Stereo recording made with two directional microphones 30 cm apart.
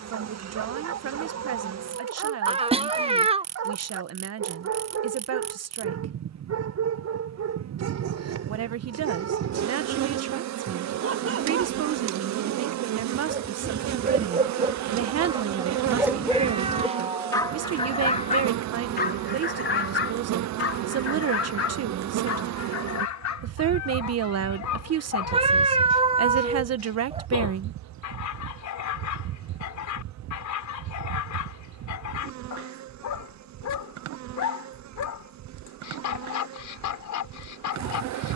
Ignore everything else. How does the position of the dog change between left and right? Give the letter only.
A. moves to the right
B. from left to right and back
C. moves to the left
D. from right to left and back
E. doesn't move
C.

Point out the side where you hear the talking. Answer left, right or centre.
right.